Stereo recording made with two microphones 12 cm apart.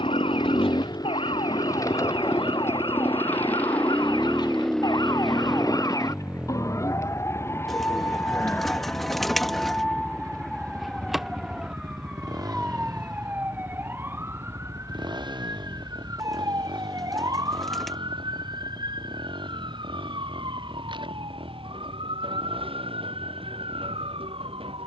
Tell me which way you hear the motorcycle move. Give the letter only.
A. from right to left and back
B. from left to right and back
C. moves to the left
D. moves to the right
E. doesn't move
D.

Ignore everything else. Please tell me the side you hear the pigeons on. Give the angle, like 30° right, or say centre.
centre.